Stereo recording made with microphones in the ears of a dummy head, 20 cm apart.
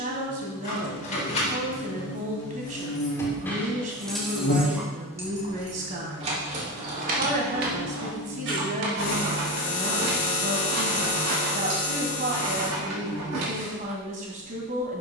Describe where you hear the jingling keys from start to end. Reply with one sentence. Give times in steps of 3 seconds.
In this clip you hear the jingling keys on the left from 0 s, in the centre from 3 s and on the right from 6 s.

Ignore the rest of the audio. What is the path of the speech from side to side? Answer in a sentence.
In this clip you hear the speech stay put.